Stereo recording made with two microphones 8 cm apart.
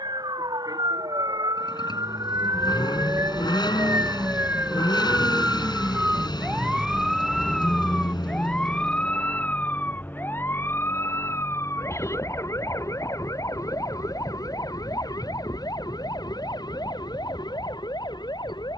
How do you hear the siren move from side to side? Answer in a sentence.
In this clip you hear the siren move from right to left.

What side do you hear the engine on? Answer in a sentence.
In this clip you hear the engine on the left.